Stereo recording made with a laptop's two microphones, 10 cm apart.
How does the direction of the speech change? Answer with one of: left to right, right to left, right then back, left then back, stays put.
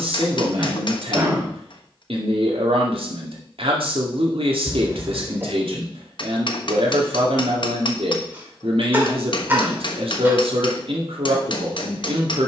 stays put.